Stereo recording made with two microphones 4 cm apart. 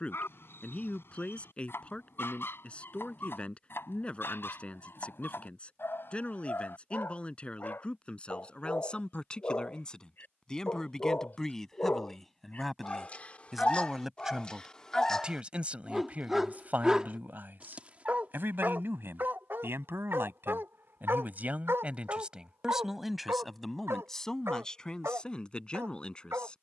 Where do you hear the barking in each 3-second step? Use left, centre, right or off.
left, left, left, left, left, centre, right, right, right.